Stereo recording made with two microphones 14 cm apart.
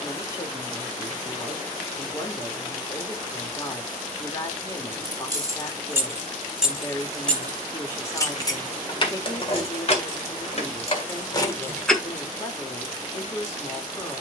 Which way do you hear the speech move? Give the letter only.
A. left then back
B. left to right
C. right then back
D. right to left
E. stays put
E.